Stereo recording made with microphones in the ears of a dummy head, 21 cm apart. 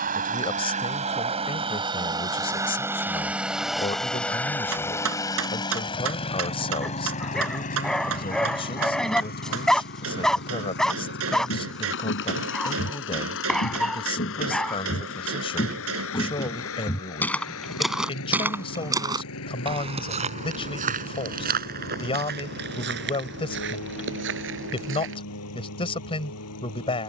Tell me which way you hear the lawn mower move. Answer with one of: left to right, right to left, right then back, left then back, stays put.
right to left.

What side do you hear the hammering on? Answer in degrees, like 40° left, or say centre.
70° right.